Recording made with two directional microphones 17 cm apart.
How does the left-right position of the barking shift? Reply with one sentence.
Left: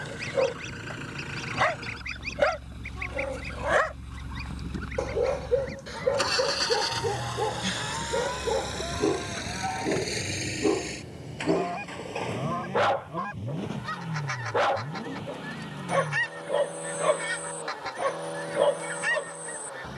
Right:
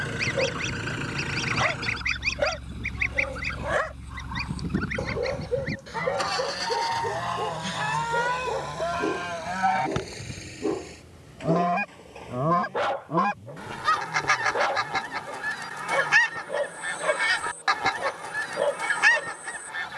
In this clip you hear the barking stay put.